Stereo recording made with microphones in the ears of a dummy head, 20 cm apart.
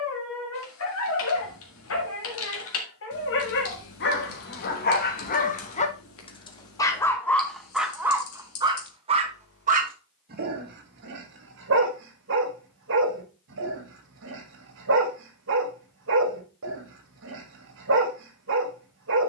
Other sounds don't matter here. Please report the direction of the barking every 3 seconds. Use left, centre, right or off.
left, left, centre, right, right, right, right.